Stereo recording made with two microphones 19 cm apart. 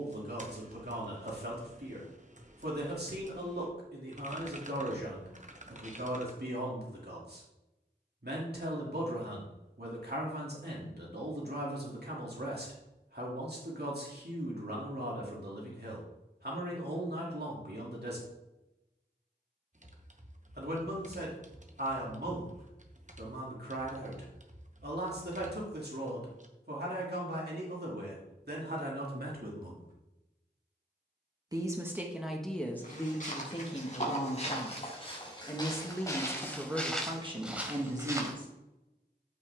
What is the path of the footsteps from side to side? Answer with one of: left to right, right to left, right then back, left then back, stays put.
left to right.